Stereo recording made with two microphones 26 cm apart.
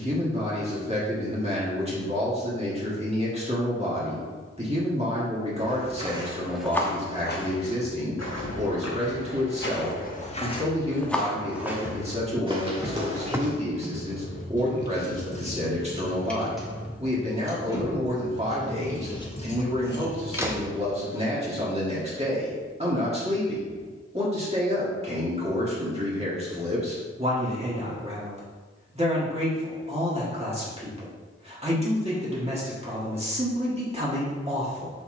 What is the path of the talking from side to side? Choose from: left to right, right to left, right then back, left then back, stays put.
stays put.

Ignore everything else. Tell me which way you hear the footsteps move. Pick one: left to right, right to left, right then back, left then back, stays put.
left then back.